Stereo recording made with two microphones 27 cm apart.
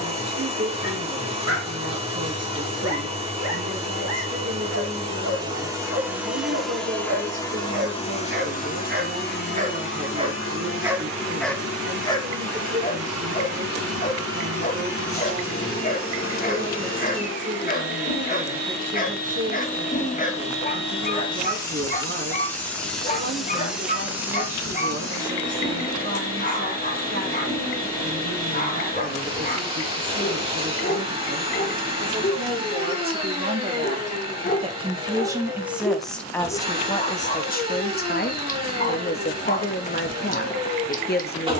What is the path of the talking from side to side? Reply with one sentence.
In this clip you hear the talking go from the right side to the left.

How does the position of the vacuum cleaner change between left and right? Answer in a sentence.
You can hear the vacuum cleaner go left and come back.